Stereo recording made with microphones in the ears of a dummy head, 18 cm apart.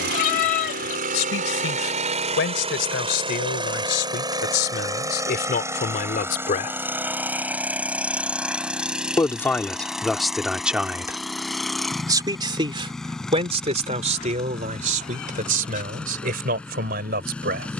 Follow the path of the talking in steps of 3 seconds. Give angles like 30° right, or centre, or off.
60° left, 50° left, 40° left, centre, 30° right, 50° right.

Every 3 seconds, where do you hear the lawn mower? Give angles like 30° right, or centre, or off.
40° right, 20° right, 10° right, centre, centre, 10° left.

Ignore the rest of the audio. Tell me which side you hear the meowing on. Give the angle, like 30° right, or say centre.
40° left.